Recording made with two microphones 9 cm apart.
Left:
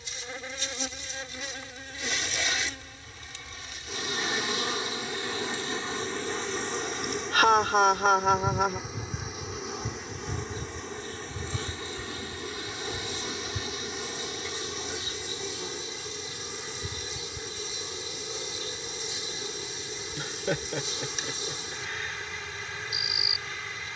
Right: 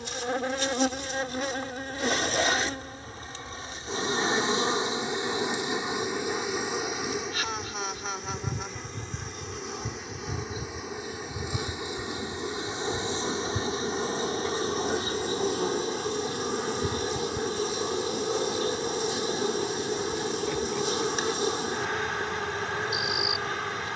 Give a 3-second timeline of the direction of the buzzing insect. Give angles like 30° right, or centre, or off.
50° right, 30° right, centre, 10° right, 30° right, 50° right, 60° right, 60° right.